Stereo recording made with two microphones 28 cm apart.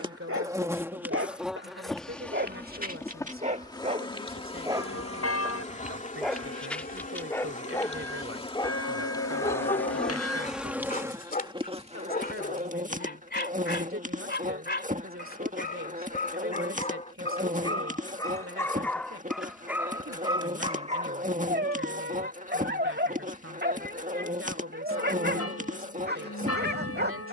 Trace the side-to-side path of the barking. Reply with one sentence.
In this clip you hear the barking move from right to left and back again.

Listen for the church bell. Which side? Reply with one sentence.
In this clip you hear the church bell on the left.